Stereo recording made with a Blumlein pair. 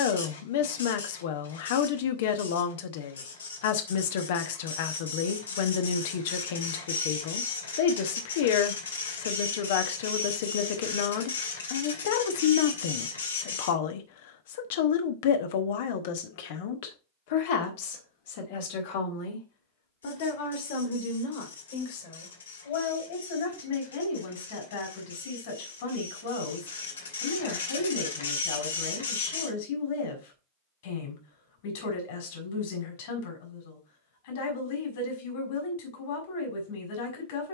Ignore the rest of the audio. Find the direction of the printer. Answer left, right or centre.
left.